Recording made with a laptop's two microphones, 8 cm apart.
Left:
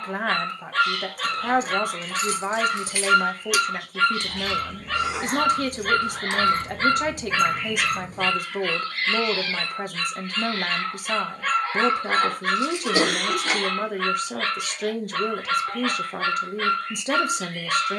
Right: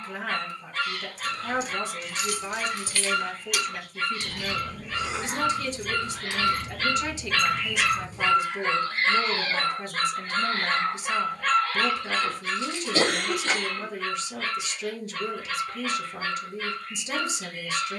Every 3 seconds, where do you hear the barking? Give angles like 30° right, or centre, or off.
80° left, 70° left, 10° left, 20° right, 70° left, 70° left.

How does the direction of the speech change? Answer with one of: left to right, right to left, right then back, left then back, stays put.
stays put.